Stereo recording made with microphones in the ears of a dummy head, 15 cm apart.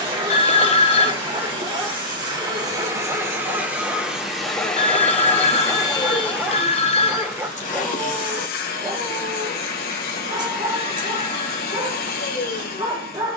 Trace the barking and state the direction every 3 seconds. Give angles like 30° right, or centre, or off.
30° right, centre, 10° right, 30° right, 30° right.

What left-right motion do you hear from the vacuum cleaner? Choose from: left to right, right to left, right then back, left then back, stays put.
right to left.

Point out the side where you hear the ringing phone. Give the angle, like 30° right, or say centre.
40° left.